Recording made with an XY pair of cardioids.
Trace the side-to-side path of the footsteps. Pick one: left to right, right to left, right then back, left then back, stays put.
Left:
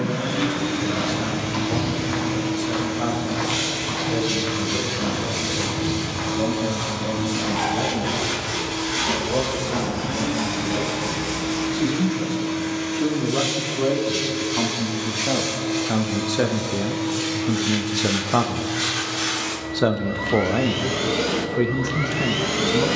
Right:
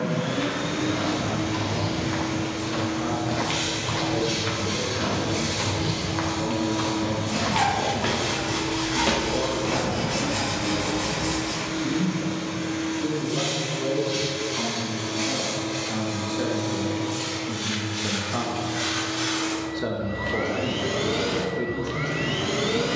left to right.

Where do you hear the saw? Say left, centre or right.
right.